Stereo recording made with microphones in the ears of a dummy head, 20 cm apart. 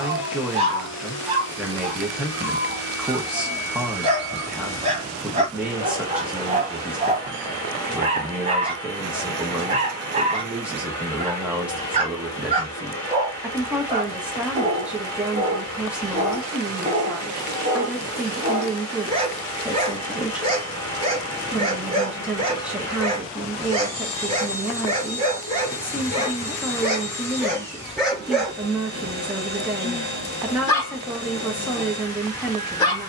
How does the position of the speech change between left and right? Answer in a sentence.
In this clip you hear the speech stay put.